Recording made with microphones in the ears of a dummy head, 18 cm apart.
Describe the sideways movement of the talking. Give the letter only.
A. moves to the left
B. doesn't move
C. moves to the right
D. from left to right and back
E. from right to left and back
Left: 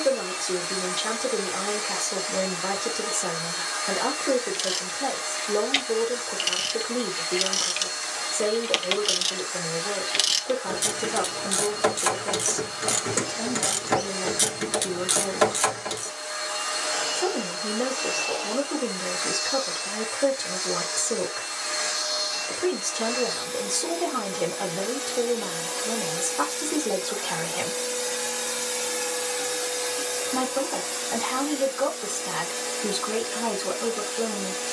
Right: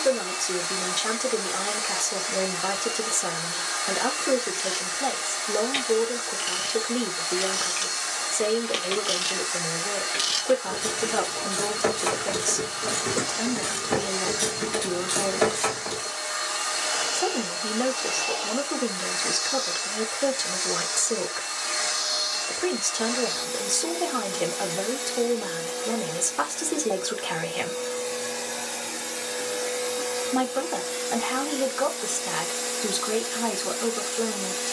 B.